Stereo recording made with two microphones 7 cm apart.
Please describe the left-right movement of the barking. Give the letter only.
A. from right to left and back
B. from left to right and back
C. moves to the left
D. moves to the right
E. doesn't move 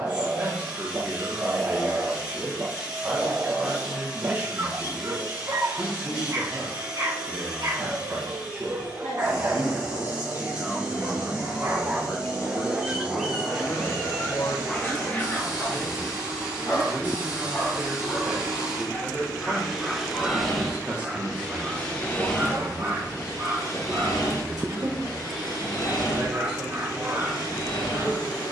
A.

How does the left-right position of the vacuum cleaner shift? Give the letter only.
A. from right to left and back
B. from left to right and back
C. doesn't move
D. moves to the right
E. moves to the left
E.